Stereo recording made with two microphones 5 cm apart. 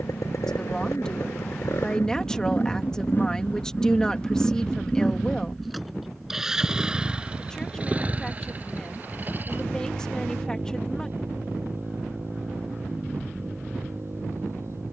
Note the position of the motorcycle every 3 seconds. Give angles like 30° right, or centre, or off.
60° left, 20° left, 20° right, 40° right, 50° right.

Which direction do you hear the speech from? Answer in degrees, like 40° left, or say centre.
10° left.